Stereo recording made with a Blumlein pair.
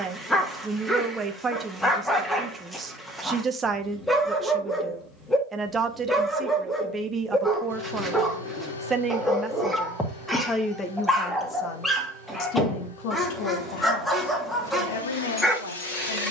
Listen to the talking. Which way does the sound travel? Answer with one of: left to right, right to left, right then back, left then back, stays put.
right to left.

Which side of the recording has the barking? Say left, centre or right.
centre.